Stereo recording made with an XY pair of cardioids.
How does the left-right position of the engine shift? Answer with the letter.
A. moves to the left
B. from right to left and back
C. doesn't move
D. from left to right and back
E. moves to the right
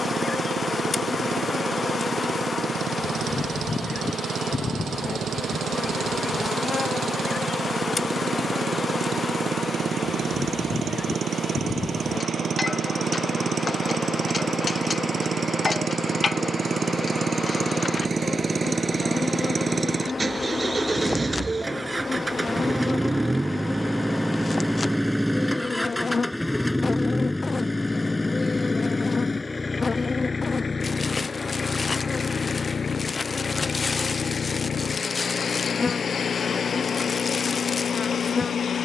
A.